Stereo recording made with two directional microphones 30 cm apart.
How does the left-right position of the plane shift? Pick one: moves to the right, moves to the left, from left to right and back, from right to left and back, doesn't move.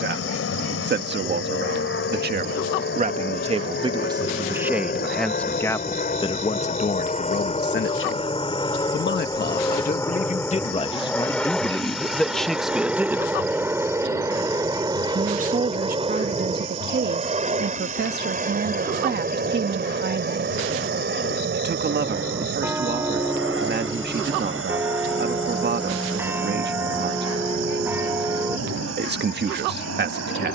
moves to the right.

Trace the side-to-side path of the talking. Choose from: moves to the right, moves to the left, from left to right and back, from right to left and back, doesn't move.
from right to left and back.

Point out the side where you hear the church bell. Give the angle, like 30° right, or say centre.
10° right.